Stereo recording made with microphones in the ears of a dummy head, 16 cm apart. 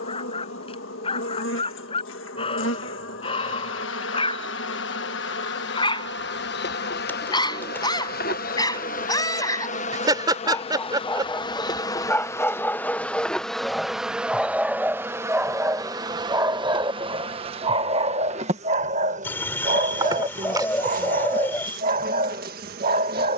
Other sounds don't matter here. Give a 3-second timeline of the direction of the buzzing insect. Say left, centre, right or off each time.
left, left, left, left, centre, right, right, right.